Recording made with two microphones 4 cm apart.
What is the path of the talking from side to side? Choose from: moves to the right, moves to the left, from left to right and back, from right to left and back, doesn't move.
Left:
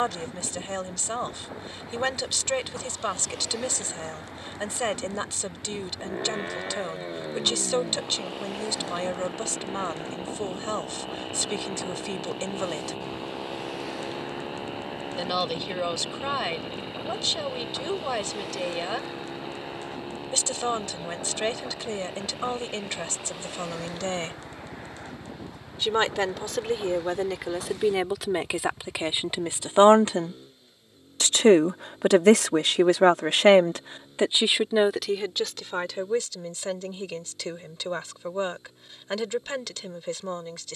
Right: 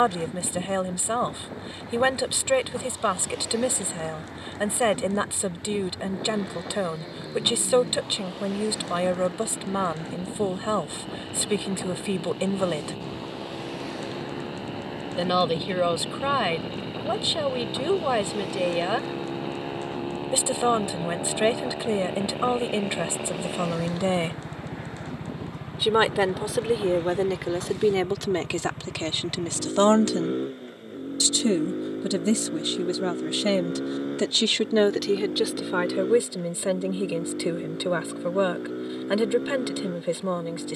from right to left and back.